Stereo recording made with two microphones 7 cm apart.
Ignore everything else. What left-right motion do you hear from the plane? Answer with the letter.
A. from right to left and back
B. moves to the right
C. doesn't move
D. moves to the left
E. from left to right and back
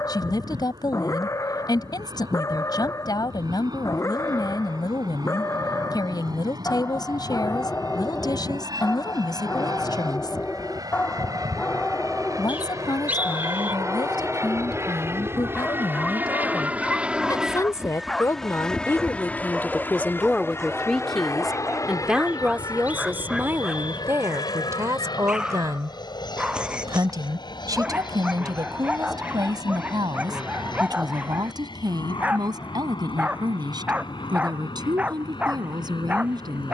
D.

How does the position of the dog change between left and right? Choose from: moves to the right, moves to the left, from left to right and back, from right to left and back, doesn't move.
moves to the right.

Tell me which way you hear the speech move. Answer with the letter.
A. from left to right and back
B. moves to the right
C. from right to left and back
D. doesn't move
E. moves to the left
B.